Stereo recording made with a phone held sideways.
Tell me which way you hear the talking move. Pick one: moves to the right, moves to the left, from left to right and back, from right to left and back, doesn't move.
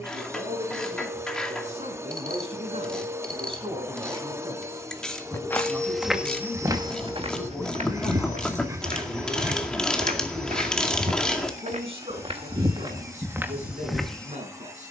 from right to left and back.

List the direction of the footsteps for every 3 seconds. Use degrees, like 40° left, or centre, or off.
off, 10° left, 40° right, 60° right, 20° right.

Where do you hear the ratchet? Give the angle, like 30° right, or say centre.
10° left.